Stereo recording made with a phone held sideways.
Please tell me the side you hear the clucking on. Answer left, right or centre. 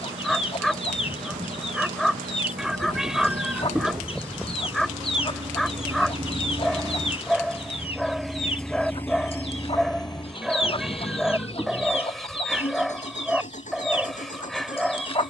left.